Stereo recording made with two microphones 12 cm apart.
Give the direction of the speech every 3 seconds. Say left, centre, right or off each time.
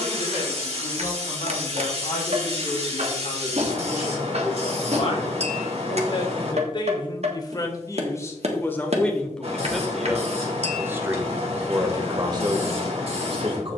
left, left, left, centre, right.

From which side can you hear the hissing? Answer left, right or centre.
right.